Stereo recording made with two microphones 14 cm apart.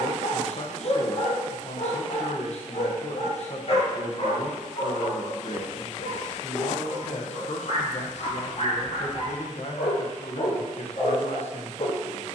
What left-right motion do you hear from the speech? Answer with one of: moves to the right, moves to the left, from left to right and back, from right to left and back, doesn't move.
doesn't move.